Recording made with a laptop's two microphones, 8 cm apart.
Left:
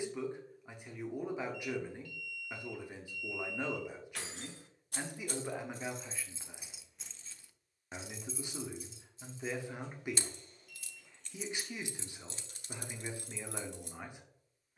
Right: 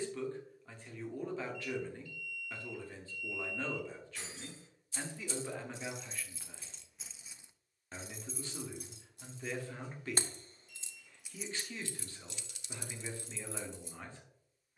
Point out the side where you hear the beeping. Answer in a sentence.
You can hear the beeping on the left.